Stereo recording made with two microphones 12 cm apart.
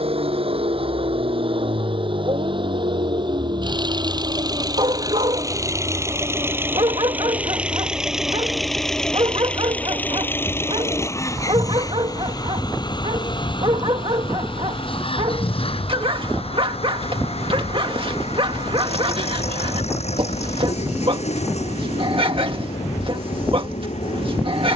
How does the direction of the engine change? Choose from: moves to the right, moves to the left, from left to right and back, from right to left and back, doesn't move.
moves to the left.